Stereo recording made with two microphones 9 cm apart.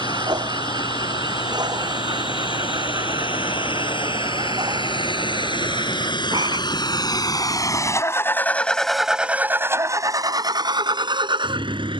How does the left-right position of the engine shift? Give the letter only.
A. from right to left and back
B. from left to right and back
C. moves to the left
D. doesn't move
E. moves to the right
E.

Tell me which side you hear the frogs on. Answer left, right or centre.
right.